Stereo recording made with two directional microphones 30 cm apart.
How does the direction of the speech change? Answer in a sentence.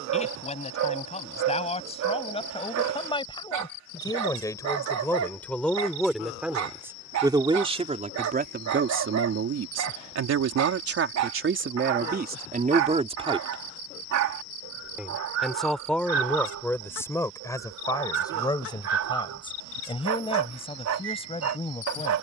You can hear the speech go right and come back.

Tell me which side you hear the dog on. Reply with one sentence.
You can hear the dog on the right.